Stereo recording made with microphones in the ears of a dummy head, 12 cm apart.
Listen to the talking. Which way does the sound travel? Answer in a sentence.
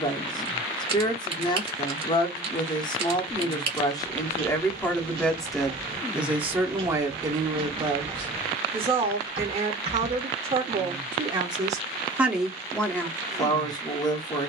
In this clip you hear the talking move from left to right and back again.